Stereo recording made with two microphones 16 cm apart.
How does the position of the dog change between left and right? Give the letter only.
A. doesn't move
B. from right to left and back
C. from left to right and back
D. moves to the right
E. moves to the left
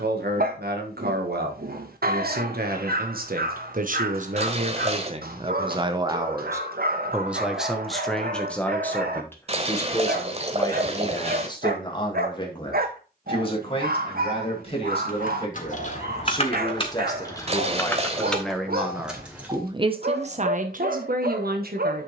A.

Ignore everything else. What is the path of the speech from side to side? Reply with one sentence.
You can hear the speech go left and come back.